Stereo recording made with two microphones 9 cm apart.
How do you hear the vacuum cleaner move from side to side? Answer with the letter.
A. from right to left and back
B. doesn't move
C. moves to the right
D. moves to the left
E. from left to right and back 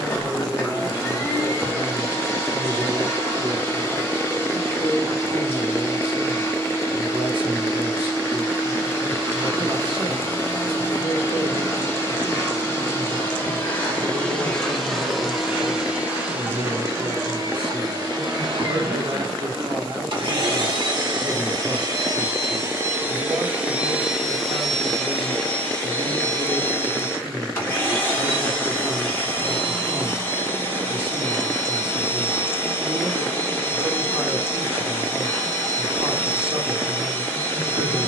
E.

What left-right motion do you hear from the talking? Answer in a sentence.
You can hear the talking stay put.